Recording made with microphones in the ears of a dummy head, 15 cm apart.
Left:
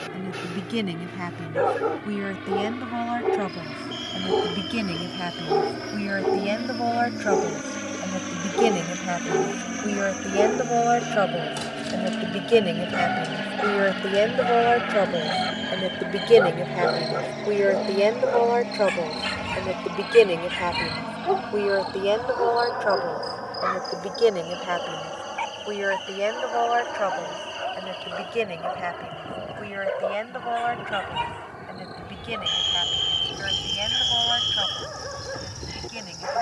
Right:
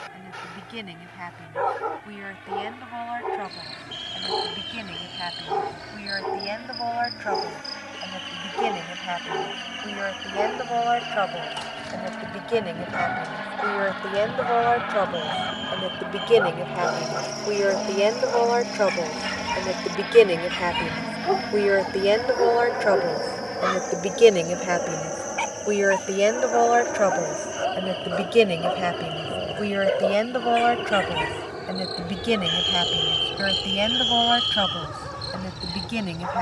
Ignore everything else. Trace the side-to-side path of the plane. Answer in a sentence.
In this clip you hear the plane go from the left side to the right.